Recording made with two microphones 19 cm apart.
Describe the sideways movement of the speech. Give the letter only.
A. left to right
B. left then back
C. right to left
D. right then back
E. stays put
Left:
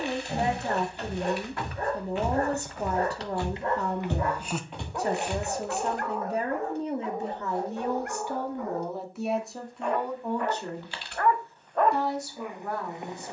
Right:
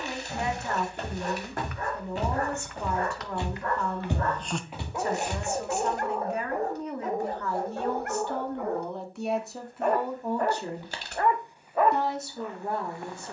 A.